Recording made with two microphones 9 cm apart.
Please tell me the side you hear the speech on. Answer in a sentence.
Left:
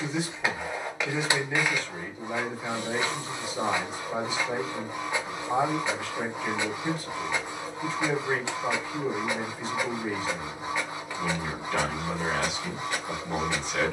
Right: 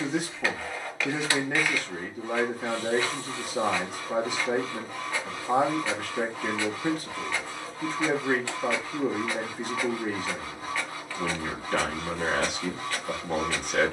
In this clip you hear the speech on the right.